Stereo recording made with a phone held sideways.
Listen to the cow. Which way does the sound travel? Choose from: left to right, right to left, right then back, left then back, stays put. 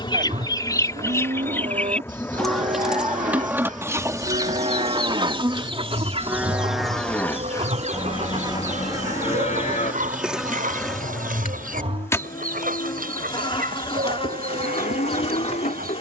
right to left.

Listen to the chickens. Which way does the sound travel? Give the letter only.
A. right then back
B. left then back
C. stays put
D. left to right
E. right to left
D.